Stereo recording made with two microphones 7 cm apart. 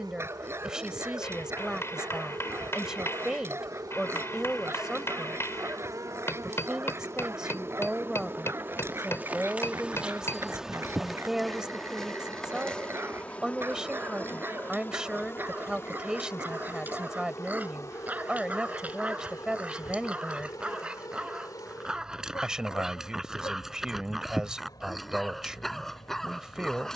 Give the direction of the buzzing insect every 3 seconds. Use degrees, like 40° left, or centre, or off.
60° right, 50° right, 30° right, 10° right, 20° left, 40° left, 50° left, 60° left, 60° left.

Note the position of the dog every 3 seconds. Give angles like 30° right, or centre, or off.
30° right, 30° right, 30° right, 30° right, 30° right, 20° right, 20° right, 10° right, centre.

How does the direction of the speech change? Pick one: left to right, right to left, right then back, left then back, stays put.
stays put.